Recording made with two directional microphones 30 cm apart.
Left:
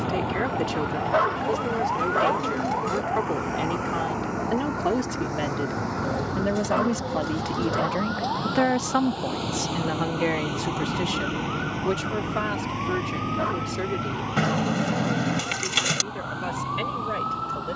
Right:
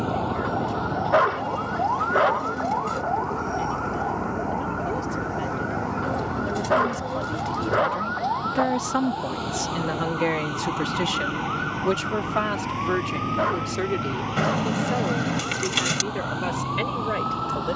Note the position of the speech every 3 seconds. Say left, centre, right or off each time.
left, left, left, centre, right, right.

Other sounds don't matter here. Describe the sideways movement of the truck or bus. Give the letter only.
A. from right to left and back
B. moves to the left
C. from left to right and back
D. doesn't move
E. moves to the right
E.